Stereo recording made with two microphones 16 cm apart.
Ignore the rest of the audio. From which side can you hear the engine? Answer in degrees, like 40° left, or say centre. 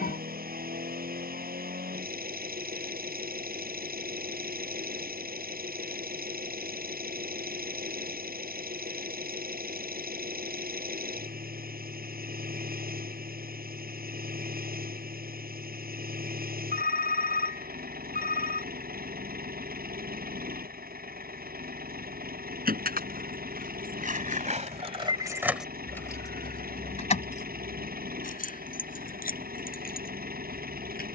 70° right.